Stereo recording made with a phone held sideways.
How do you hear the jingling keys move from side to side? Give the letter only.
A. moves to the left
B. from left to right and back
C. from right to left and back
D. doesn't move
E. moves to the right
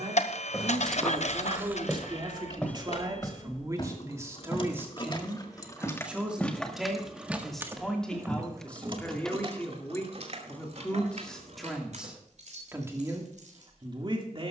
E.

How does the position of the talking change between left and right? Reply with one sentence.
You can hear the talking go left and come back.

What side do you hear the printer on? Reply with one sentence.
In this clip you hear the printer on the left.